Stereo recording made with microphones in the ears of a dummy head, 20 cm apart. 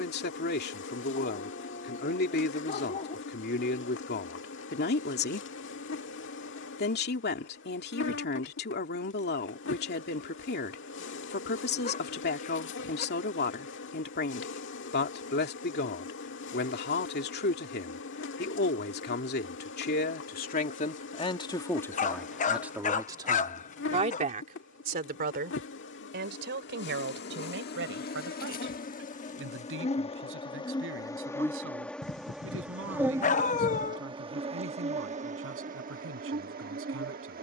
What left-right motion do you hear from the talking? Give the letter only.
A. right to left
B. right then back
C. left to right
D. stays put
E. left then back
C.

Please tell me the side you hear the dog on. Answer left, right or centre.
left.